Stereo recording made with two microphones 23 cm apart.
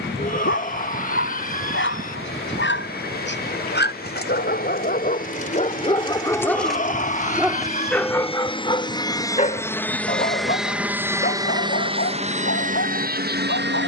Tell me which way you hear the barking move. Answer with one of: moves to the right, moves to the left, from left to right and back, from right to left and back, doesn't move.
from left to right and back.